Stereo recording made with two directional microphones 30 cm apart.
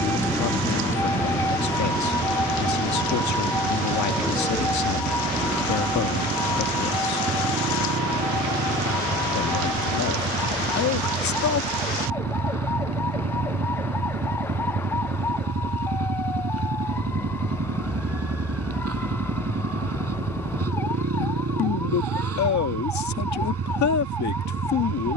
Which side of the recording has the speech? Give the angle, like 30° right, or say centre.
70° left.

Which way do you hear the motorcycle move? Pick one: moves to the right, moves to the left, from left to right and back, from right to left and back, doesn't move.
doesn't move.